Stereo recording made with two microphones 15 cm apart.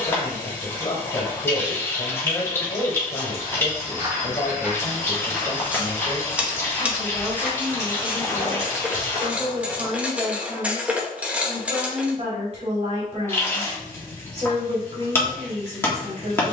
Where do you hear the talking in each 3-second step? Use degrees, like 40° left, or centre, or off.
40° left, 30° left, centre, 40° right, 40° right, 40° right.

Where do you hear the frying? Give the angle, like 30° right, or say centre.
20° left.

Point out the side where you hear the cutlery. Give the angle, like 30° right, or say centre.
10° right.